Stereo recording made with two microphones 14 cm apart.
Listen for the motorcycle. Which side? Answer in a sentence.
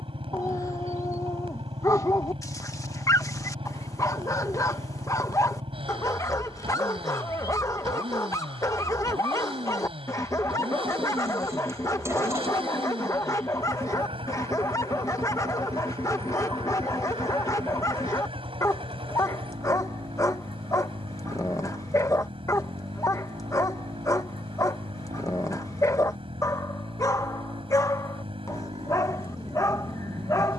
You can hear the motorcycle on the right.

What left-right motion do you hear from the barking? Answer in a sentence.
You can hear the barking stay in one place.